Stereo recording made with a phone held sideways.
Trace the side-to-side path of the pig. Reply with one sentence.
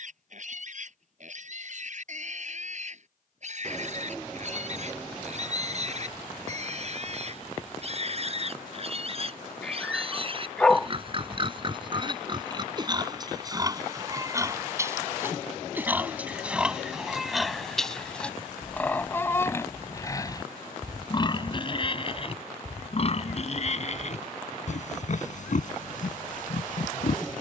You can hear the pig move to the left.